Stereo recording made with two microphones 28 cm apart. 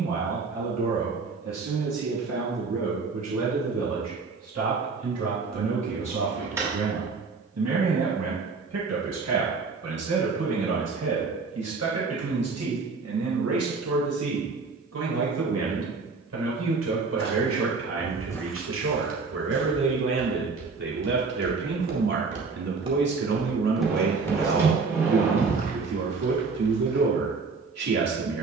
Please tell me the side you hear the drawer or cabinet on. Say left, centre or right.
centre.